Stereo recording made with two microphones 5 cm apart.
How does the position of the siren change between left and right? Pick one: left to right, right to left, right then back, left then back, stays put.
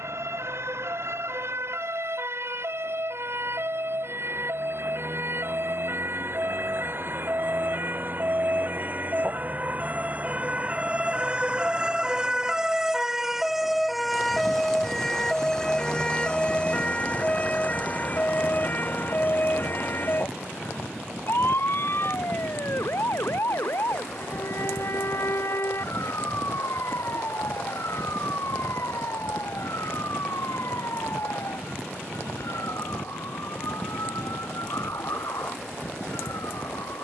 right to left.